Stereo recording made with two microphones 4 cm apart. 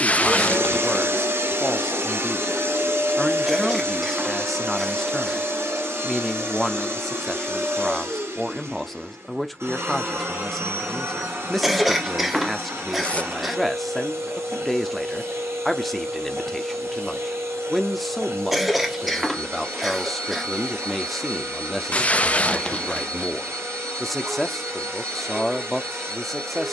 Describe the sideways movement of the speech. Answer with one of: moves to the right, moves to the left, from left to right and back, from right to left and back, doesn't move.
doesn't move.